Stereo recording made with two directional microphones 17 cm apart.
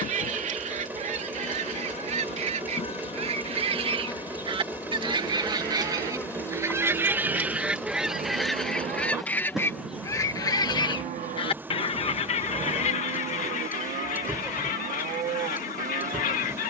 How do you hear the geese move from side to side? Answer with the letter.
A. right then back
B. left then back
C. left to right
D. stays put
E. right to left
E.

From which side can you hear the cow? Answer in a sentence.
You can hear the cow on the right.